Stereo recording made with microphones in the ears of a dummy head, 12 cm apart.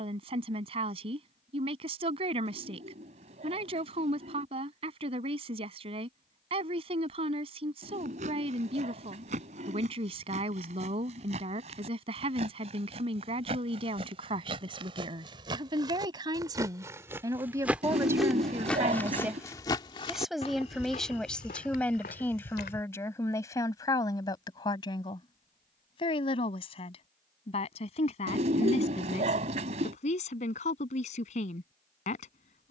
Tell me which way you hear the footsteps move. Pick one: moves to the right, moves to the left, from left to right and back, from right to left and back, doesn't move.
moves to the left.